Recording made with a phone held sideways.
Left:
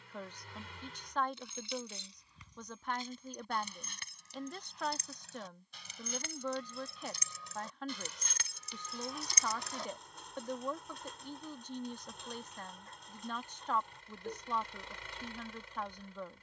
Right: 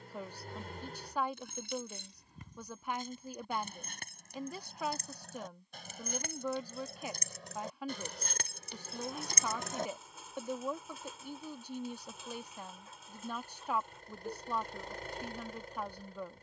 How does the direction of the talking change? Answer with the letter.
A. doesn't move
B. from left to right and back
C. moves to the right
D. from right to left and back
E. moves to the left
A.